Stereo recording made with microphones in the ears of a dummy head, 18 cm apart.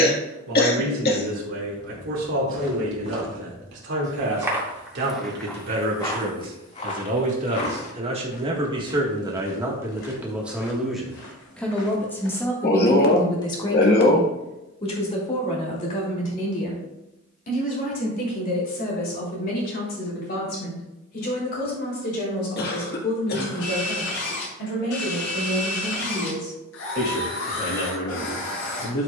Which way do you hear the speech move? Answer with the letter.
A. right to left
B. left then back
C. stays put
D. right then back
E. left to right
A.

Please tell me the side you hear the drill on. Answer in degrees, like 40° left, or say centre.
70° left.